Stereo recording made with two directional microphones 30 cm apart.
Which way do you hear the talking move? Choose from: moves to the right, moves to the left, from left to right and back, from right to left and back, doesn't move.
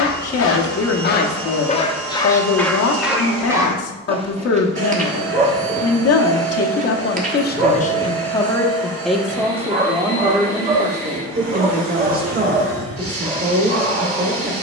moves to the right.